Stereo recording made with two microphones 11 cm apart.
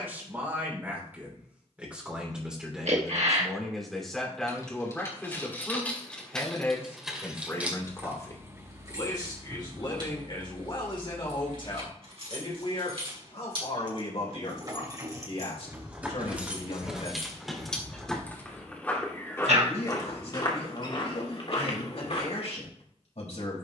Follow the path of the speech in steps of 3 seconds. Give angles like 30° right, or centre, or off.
10° right, centre, 20° left, 40° left, 60° left, 70° left, 70° left, 70° left.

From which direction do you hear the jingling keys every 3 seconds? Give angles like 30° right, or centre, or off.
off, 20° left, 10° right, 40° right, 50° right, 10° right, 20° left, off.